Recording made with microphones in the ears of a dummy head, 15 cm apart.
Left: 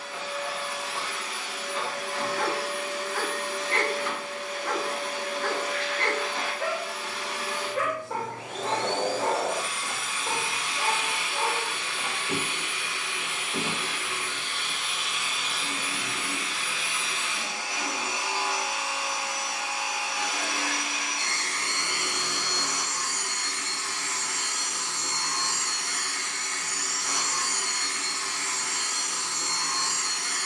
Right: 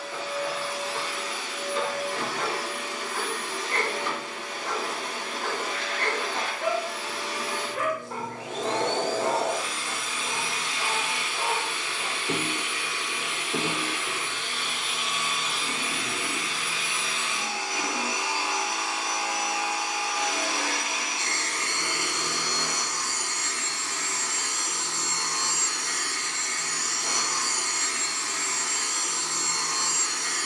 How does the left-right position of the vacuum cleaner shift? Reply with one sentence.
You can hear the vacuum cleaner stay put.